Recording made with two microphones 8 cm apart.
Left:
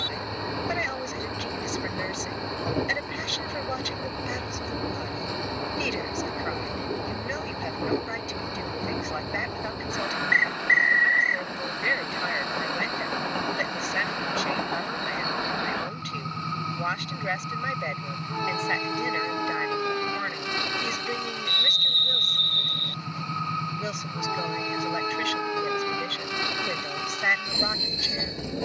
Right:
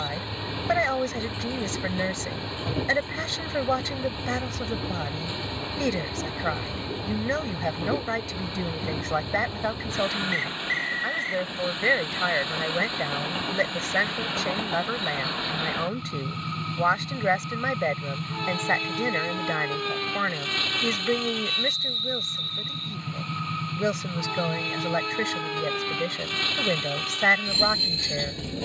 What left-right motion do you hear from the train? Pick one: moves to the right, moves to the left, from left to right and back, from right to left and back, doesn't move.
doesn't move.